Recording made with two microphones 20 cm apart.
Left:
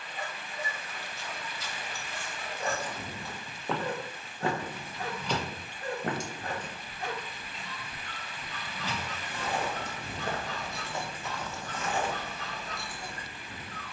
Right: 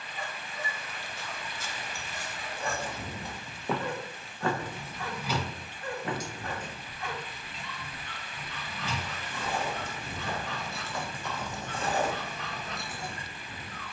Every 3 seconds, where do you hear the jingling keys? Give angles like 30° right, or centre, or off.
off, 10° right, 40° left, 20° left, 20° right.